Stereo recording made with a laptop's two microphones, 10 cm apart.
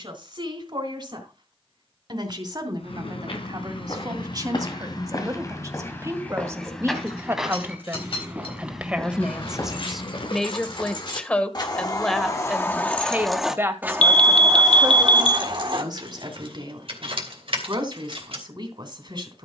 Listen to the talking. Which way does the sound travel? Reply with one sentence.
In this clip you hear the talking move from right to left and back again.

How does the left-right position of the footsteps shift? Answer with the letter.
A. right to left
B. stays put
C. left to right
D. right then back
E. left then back
D.